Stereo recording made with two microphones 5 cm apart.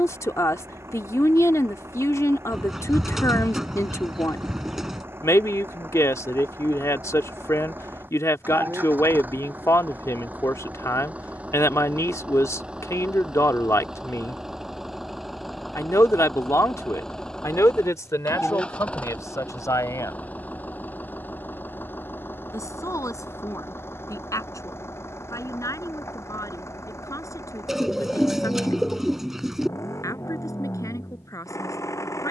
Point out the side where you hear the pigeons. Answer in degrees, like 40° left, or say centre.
10° right.